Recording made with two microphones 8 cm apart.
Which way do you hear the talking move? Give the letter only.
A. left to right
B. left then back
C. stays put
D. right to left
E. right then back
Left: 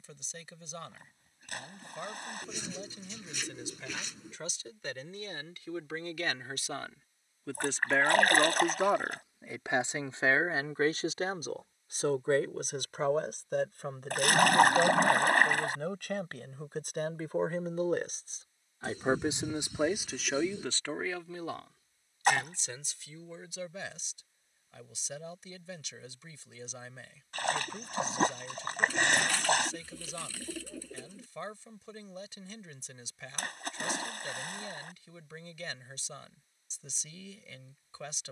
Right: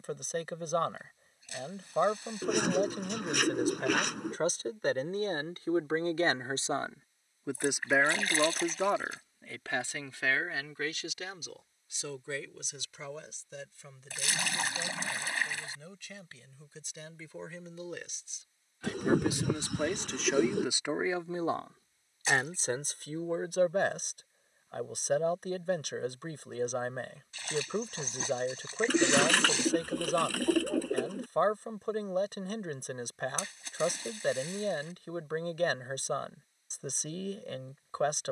B.